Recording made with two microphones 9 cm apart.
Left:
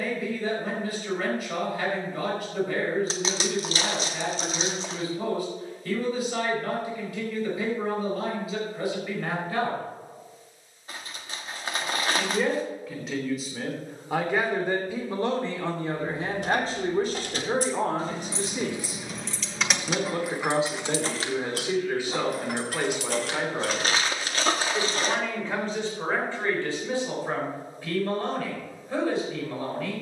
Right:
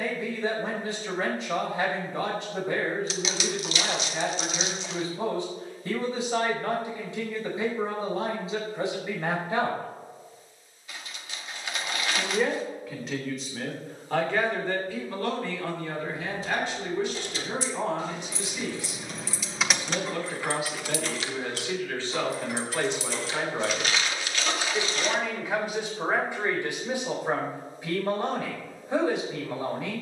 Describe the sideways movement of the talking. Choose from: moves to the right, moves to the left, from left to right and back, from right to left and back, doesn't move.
from right to left and back.